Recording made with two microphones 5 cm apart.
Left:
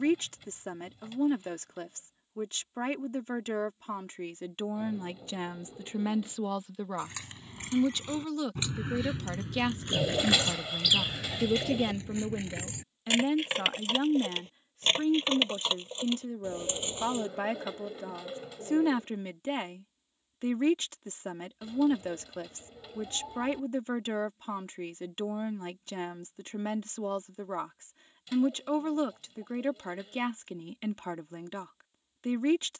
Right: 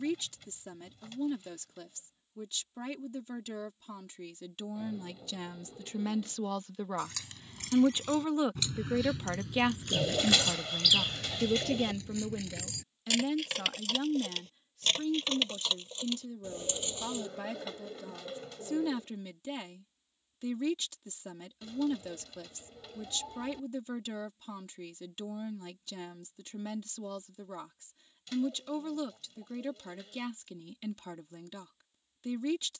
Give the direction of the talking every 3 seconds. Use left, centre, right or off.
left, left, centre, centre, left, left, left, left, left, left, left.